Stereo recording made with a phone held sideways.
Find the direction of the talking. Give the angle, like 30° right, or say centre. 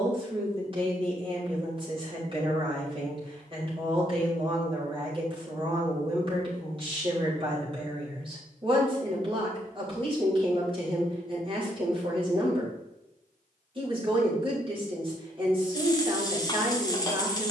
40° right.